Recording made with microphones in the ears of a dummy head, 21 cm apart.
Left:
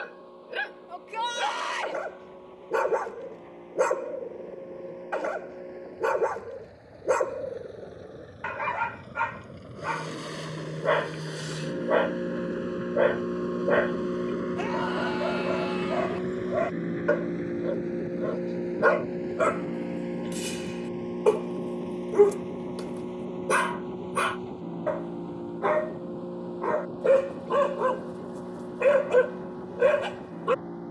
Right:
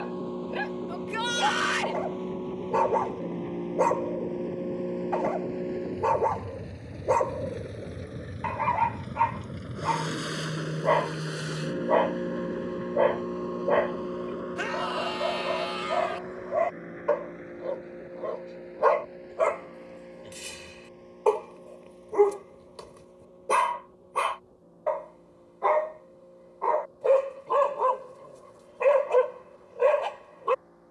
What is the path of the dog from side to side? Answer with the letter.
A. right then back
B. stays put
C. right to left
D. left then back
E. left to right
B.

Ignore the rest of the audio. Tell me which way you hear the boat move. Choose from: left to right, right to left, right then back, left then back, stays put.
right to left.